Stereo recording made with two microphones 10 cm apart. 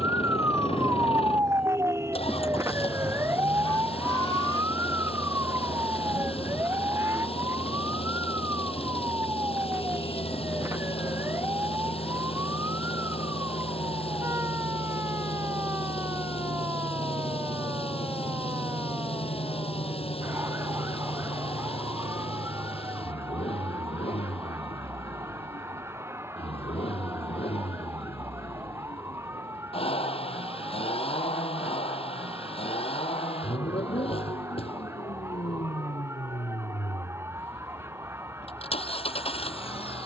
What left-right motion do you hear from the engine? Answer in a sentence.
You can hear the engine stay put.